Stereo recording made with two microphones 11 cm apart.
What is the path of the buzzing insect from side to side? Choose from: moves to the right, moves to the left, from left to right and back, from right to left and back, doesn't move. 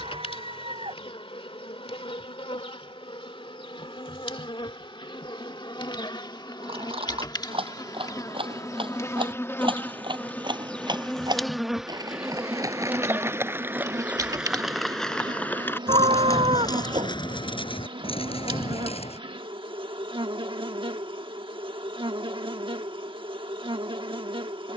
moves to the right.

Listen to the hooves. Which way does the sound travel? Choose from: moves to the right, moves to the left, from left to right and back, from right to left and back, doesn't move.
moves to the left.